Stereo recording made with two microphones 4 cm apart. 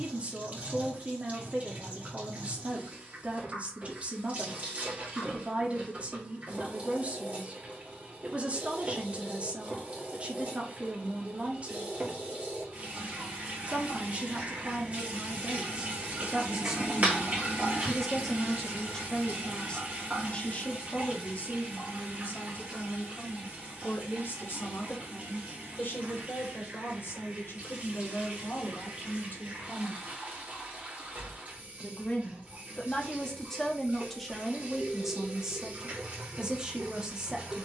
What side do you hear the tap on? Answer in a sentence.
In this clip you hear the tap on the right.